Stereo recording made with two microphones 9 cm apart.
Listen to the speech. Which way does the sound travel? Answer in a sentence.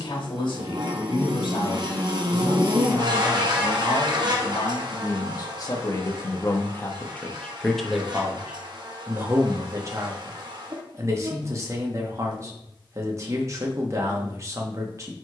You can hear the speech travel towards the right.